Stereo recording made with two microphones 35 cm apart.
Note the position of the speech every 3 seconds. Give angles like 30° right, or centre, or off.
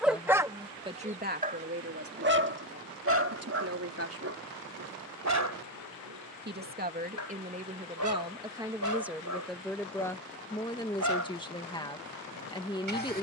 30° right, 40° right, 20° right, 10° left, 10° left.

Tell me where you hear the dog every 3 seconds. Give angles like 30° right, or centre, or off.
20° right, 50° right, 60° right, 60° right, 60° right.